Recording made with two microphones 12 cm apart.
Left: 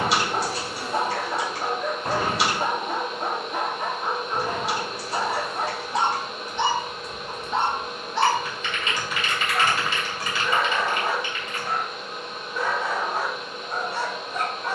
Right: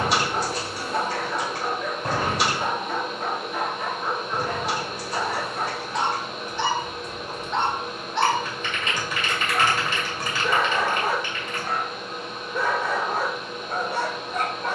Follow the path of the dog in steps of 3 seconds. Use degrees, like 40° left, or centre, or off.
20° left, 20° left, 10° left, 30° right, 50° right.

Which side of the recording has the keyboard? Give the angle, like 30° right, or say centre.
40° right.